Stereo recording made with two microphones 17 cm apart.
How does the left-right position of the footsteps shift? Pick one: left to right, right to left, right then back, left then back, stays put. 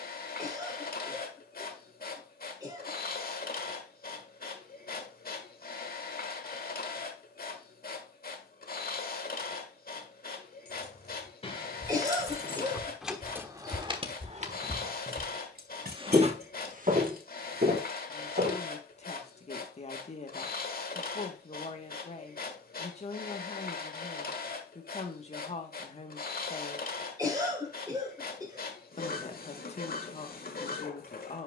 left to right.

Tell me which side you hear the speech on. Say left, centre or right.
left.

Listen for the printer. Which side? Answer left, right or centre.
left.